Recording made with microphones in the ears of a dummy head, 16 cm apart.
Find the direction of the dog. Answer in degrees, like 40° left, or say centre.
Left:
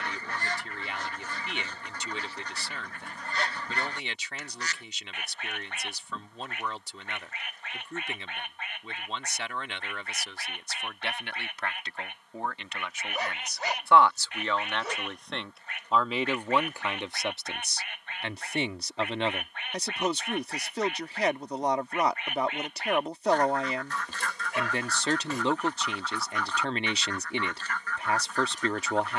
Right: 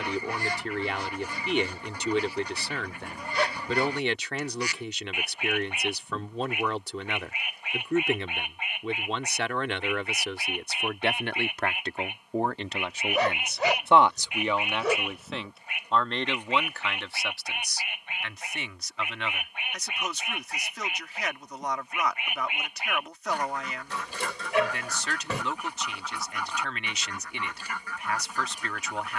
50° right.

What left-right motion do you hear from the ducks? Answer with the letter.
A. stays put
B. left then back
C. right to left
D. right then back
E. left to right
A.